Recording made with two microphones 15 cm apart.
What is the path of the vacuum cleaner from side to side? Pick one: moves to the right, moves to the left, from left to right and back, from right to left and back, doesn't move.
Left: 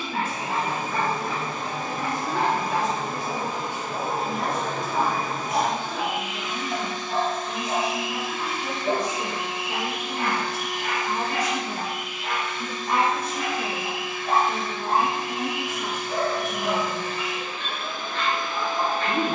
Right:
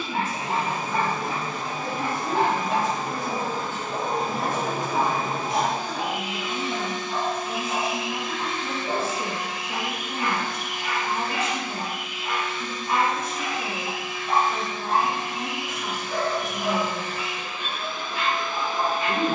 from left to right and back.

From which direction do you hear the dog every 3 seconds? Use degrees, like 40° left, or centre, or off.
30° right, 10° right, 40° left, 60° left, 60° left, 10° left, 10° right.